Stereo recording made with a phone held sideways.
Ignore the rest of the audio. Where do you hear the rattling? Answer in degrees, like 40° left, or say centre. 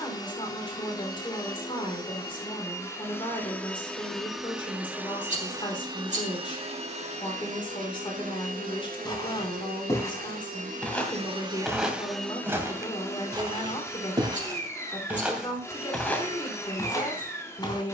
50° right.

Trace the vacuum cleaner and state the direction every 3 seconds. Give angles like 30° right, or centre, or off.
30° left, centre, 50° right, 50° right, 20° left, 20° left.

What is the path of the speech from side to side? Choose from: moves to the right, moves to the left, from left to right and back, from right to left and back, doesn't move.
doesn't move.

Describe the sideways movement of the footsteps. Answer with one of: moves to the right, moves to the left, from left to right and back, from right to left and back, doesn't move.
from left to right and back.